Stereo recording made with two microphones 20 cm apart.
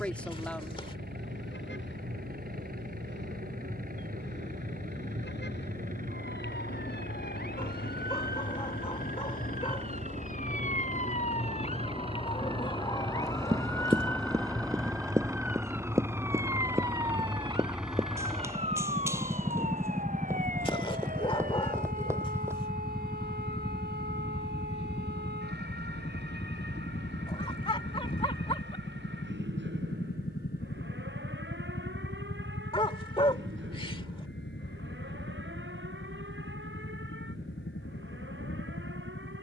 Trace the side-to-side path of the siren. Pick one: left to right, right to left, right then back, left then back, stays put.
left to right.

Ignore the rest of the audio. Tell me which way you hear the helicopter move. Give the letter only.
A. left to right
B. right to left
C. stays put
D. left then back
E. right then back
B.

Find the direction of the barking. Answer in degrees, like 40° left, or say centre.
30° left.